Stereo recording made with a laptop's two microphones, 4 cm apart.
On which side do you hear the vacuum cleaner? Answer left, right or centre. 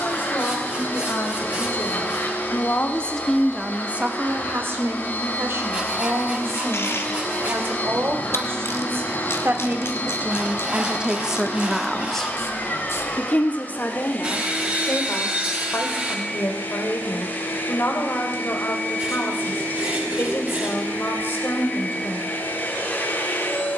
left.